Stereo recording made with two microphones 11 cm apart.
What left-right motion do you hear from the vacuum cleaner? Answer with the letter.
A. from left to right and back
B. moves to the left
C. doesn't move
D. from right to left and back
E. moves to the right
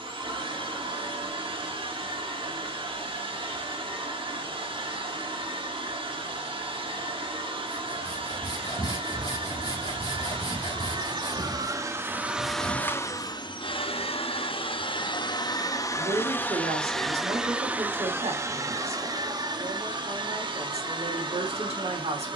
D.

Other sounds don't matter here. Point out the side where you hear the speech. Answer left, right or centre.
right.